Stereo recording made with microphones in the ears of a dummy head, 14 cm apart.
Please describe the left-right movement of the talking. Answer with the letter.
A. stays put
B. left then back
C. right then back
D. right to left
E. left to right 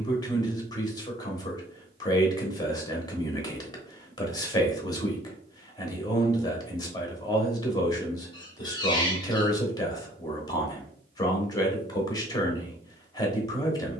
A.